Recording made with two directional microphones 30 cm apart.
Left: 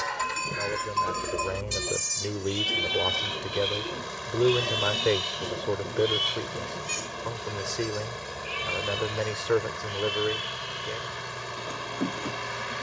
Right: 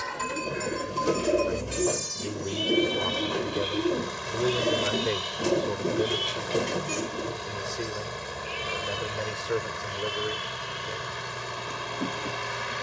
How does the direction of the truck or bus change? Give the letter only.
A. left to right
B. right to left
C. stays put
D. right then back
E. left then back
C.